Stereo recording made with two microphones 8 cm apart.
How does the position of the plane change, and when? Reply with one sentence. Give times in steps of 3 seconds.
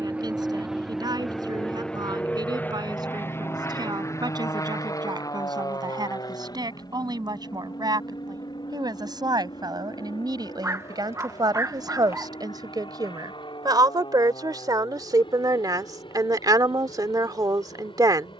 You can hear the plane in the centre from 0 s and on the left from 3 s.